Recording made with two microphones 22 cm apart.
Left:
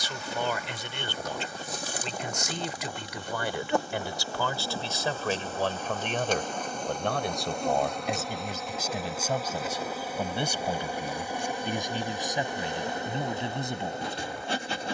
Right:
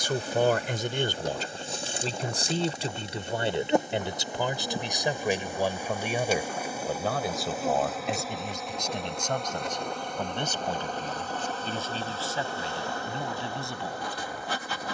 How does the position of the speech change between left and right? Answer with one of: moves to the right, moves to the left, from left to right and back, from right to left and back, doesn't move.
moves to the left.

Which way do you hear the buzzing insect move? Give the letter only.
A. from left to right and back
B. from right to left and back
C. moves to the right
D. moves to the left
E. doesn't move
D.